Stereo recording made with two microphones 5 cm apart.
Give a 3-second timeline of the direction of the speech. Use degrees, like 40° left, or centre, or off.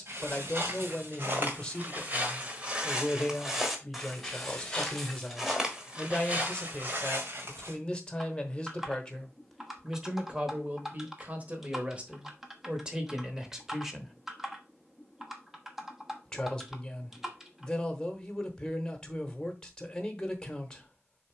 20° left, 20° left, 20° left, 20° right, 20° right, 10° left, 10° left.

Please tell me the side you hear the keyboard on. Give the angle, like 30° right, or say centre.
10° right.